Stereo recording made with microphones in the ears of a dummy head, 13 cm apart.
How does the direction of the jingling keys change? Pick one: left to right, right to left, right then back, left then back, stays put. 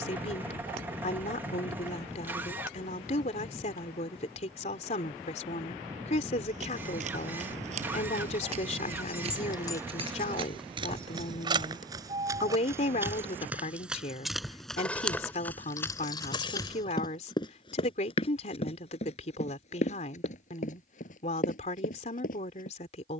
right then back.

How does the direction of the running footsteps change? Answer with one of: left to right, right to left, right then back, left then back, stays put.
right to left.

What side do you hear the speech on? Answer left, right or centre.
left.